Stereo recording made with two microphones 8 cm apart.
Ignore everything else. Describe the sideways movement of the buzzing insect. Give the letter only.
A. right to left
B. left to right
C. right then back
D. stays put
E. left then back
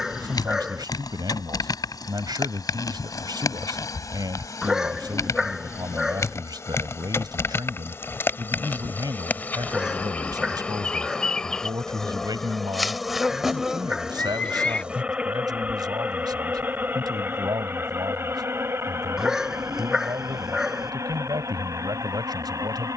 B.